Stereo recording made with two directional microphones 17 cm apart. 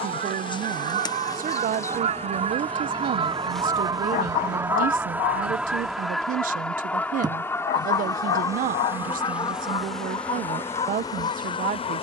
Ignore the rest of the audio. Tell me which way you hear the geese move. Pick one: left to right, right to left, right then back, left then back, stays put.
right to left.